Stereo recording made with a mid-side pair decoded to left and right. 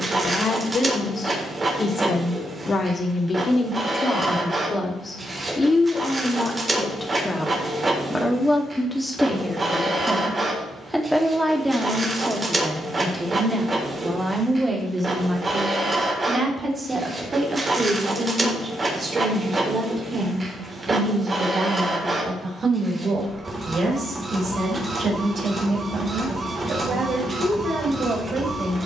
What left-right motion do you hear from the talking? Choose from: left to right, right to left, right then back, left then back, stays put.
left to right.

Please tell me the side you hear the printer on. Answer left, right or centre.
right.